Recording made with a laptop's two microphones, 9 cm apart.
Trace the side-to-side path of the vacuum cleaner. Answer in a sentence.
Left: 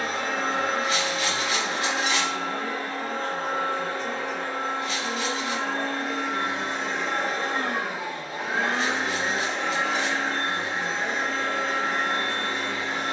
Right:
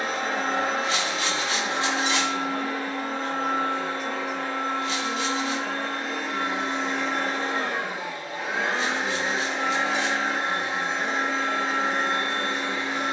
You can hear the vacuum cleaner move from right to left and back again.